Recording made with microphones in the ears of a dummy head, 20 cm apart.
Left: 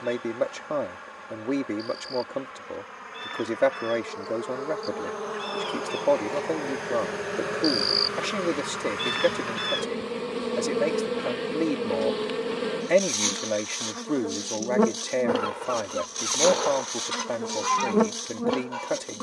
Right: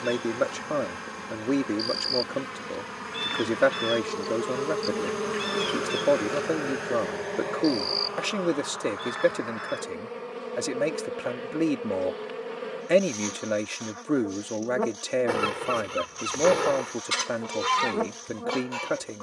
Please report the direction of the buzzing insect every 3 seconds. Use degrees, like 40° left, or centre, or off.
60° right, 40° right, 10° left, 50° left, 60° left, 60° left, 60° left.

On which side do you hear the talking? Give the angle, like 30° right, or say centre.
10° right.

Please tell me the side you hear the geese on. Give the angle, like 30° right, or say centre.
40° right.